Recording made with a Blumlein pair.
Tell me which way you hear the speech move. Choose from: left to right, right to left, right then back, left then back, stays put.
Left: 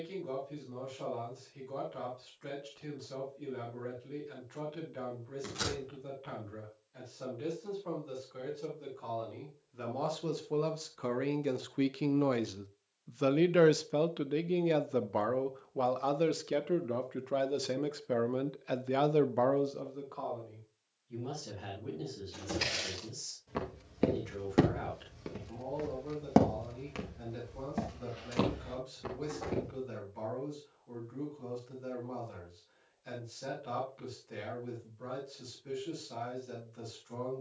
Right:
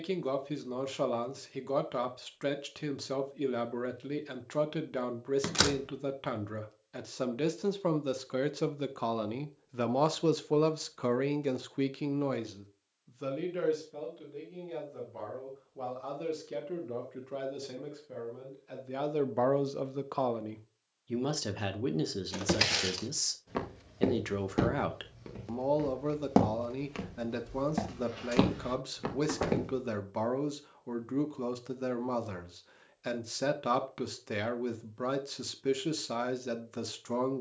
left then back.